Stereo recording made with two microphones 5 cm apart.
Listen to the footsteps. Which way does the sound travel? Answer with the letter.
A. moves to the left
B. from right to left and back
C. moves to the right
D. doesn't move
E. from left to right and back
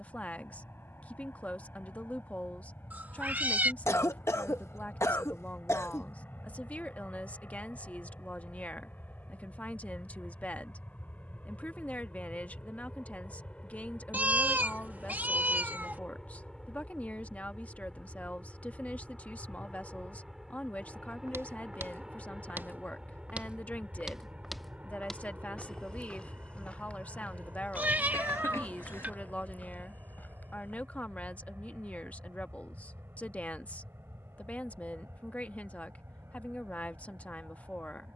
A.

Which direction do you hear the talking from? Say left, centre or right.
left.